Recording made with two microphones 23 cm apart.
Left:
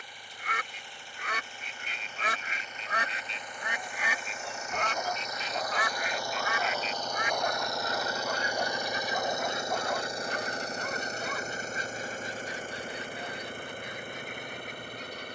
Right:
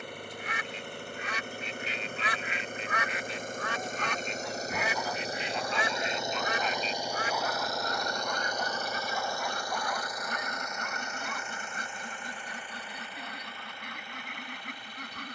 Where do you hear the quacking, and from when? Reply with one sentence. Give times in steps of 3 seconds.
You can hear the quacking on the left from 0 s, in the centre from 3 s and on the right from 6 s.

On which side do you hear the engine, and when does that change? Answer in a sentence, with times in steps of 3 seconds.
In this clip you hear the engine on the right from 0 s, in the centre from 6 s and on the left from 9 s.